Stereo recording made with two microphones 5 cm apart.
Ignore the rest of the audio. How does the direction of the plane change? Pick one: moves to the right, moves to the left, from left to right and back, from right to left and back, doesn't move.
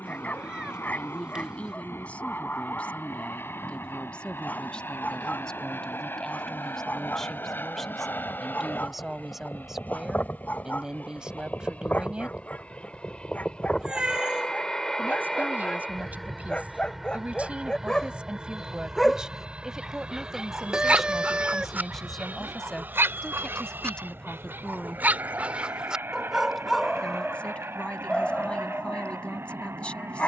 moves to the right.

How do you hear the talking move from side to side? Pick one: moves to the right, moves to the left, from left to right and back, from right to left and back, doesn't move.
from left to right and back.